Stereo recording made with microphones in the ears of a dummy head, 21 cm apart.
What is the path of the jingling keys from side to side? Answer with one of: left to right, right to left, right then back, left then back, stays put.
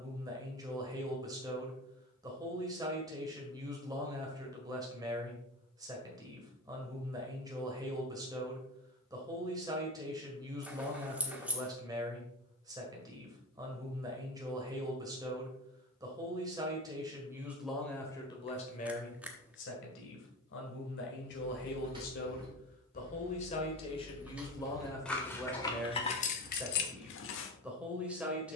right to left.